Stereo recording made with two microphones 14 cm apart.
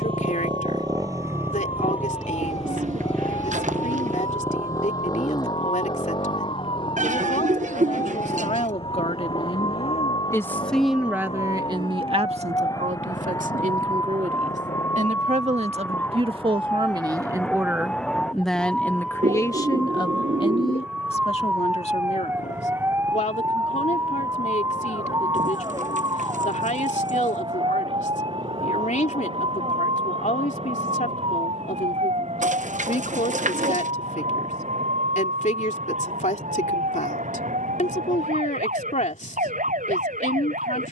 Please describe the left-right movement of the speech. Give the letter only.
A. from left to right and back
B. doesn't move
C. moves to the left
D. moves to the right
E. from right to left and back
A.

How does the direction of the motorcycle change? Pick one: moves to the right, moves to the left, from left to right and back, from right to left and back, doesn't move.
moves to the left.